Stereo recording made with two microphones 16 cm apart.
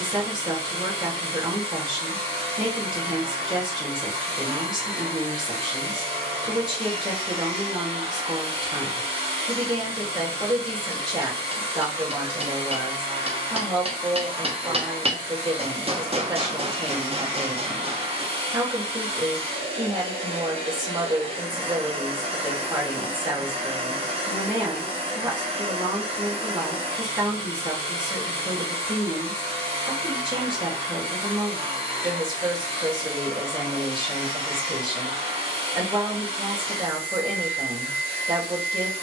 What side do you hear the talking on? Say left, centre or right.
right.